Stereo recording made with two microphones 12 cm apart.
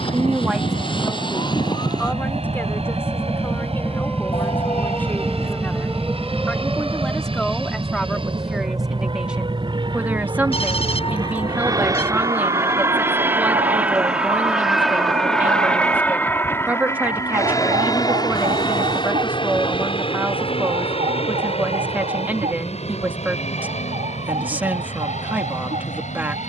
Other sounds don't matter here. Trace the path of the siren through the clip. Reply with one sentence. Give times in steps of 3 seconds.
You can hear the siren on the left from 0 s, in the centre from 3 s and on the right from 6 s.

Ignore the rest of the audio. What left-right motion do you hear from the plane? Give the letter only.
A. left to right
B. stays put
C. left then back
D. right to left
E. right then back
D.